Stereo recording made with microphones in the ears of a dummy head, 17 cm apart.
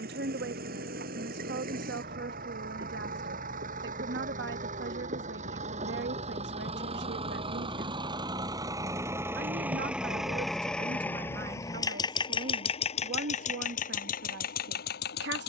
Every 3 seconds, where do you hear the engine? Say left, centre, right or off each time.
right, right, right, centre, left.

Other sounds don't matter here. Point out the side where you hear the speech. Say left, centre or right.
right.